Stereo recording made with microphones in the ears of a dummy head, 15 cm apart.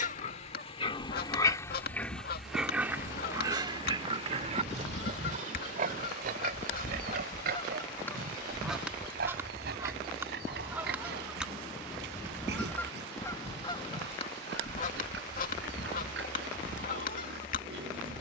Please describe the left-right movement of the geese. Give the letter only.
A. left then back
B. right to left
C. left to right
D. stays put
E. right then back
E.